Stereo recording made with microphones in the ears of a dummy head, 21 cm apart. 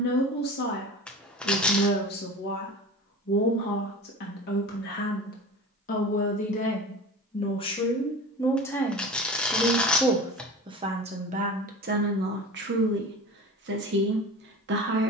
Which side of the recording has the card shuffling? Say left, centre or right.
centre.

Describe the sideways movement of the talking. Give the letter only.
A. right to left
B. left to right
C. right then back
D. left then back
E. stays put
B.